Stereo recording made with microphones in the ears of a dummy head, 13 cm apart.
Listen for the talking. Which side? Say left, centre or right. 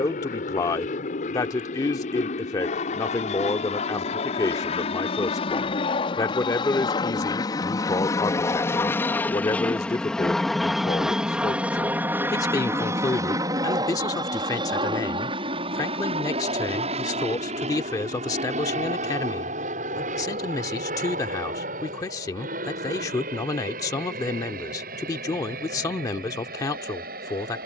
left.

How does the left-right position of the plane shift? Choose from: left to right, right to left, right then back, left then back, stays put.
left to right.